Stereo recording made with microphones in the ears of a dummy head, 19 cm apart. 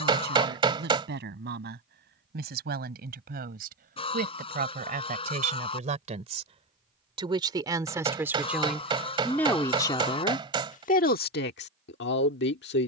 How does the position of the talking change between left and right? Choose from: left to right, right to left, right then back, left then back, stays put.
right to left.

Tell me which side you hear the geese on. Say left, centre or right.
left.